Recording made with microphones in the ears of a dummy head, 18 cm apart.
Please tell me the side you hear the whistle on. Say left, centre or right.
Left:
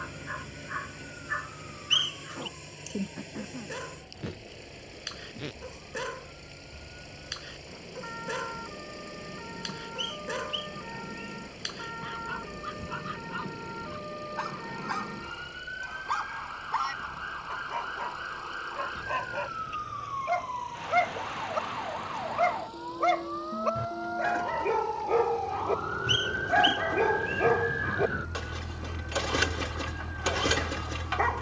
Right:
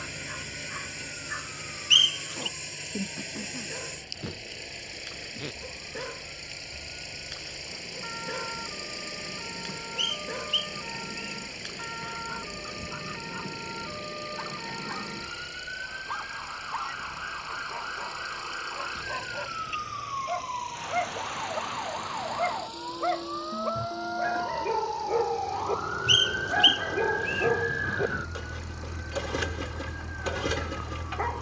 right.